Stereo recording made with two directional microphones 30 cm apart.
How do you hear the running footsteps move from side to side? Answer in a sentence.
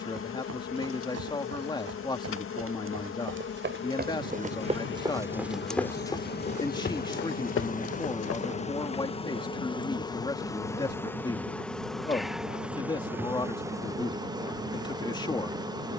In this clip you hear the running footsteps move to the left.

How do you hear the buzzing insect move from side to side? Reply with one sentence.
You can hear the buzzing insect travel towards the right.